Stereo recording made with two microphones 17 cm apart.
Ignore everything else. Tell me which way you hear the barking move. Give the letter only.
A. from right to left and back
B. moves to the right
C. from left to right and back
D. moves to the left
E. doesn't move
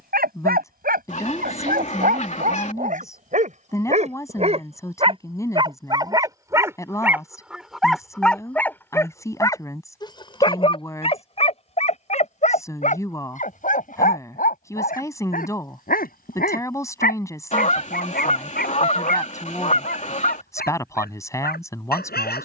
D.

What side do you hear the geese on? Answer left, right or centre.
left.